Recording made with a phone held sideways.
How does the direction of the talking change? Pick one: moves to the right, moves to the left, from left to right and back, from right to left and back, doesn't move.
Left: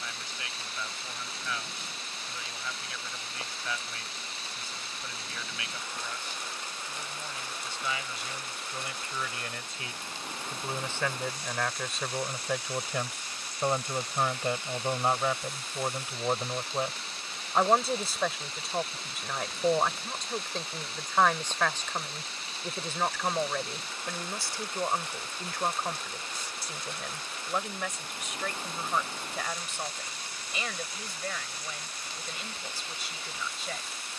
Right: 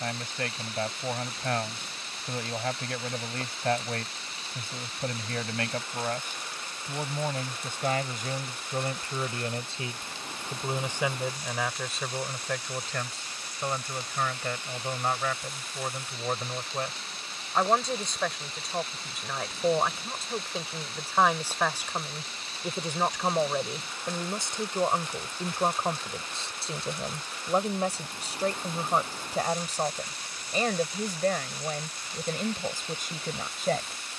from right to left and back.